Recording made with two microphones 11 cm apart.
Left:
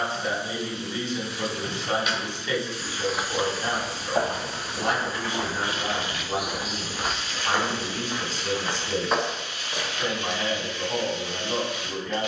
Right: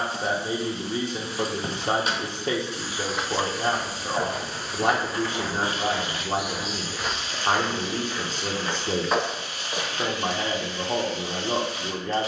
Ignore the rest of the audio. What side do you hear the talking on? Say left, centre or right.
right.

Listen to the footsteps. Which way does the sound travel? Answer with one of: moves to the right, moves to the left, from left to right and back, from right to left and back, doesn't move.
from right to left and back.